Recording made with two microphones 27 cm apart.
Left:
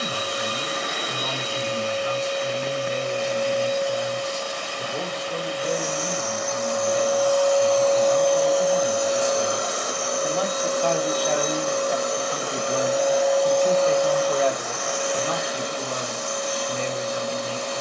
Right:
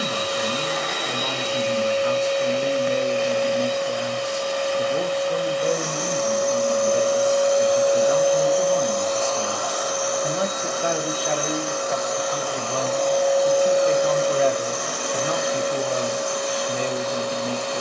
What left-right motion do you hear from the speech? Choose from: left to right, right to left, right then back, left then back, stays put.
left then back.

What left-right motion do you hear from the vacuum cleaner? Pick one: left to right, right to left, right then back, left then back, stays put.
left then back.